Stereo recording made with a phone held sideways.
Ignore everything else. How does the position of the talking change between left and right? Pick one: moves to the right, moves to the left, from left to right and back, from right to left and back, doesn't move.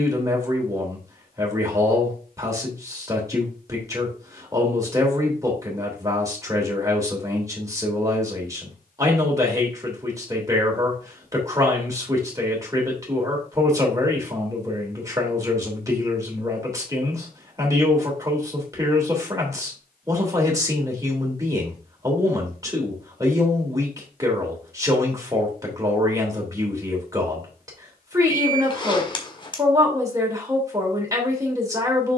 doesn't move.